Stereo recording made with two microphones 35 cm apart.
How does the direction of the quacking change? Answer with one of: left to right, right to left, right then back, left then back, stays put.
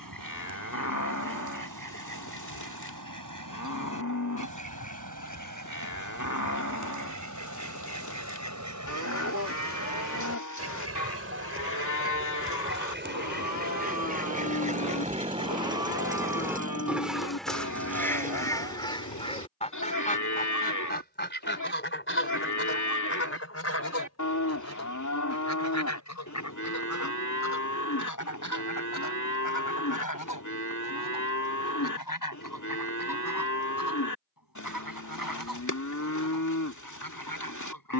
right to left.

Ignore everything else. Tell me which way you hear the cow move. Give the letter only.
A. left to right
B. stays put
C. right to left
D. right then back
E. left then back
B.